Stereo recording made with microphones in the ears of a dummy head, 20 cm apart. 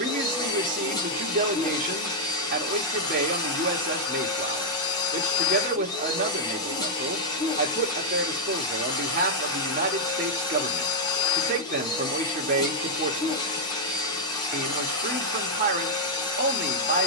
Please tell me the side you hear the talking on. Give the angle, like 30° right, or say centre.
40° right.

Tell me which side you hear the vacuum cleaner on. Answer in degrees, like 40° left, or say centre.
20° left.